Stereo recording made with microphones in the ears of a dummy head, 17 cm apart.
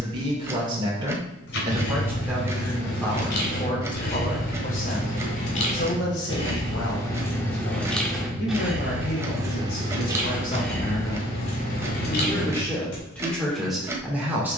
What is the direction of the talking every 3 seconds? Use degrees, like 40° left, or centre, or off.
10° right, 40° left, 60° left, 40° left, 10° left.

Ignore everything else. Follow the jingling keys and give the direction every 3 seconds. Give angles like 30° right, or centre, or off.
60° left, 50° left, 10° left, 10° left, 50° left.